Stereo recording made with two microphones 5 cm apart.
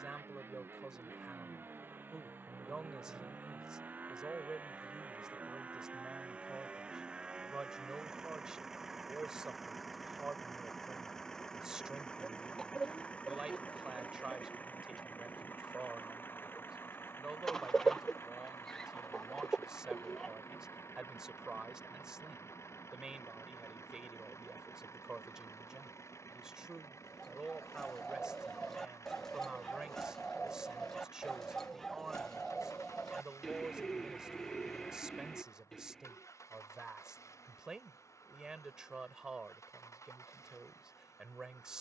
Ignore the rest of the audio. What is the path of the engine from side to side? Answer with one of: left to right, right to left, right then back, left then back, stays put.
right to left.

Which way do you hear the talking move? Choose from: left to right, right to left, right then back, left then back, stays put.
stays put.